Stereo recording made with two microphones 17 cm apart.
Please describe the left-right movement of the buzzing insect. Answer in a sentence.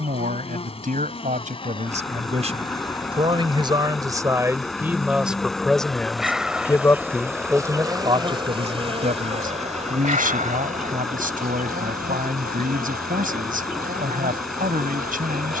In this clip you hear the buzzing insect travel towards the right.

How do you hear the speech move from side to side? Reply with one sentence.
You can hear the speech go left and come back.